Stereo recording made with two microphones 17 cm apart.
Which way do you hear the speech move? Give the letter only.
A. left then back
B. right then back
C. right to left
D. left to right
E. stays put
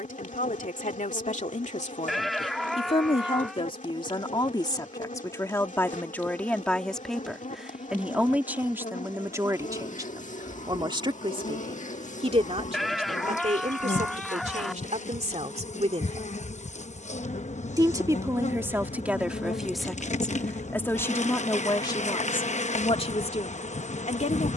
B.